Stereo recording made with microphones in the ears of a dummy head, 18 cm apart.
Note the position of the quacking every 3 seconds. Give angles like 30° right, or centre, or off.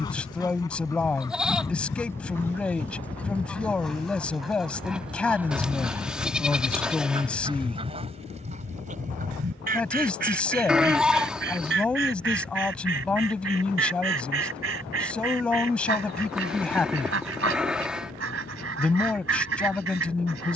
20° left, centre, 30° right, 50° right, 70° right, 70° right, 70° right.